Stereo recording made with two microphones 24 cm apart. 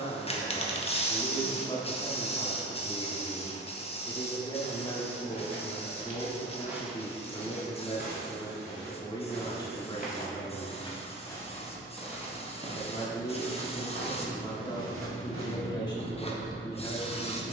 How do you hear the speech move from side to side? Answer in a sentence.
You can hear the speech stay in one place.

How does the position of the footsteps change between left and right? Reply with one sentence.
In this clip you hear the footsteps move from right to left and back again.